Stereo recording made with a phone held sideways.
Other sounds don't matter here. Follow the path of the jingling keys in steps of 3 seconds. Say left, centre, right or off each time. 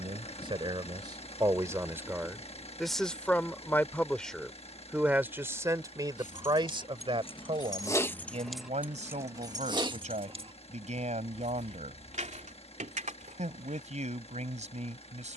off, off, left, right, right.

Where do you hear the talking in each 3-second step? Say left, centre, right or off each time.
right, centre, right, right, right.